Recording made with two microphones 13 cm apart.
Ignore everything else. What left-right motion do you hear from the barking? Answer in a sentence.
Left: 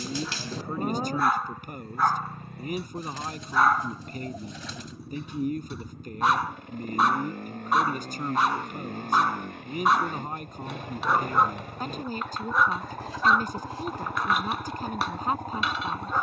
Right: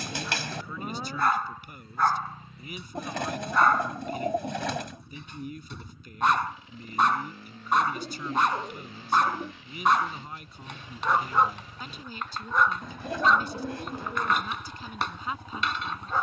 You can hear the barking stay put.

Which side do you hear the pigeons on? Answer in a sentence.
You can hear the pigeons on the right.